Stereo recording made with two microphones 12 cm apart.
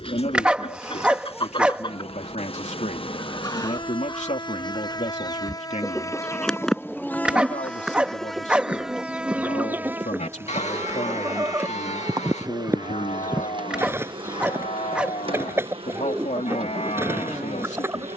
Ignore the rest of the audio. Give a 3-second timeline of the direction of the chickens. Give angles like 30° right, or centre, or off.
50° left, 20° left, centre, 20° right, 20° right, 20° right.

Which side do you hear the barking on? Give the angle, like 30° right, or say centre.
10° right.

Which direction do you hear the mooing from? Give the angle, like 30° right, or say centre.
70° left.